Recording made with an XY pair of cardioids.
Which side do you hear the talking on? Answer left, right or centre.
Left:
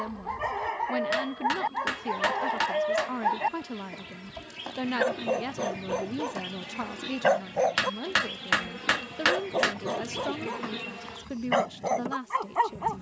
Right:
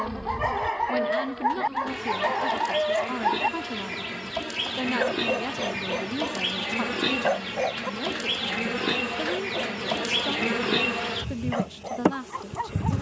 centre.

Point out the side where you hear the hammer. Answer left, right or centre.
left.